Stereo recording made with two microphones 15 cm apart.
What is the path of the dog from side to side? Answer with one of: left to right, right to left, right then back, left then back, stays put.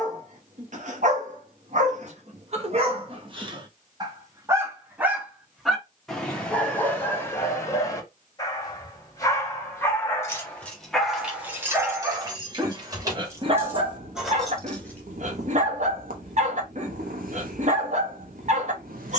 left then back.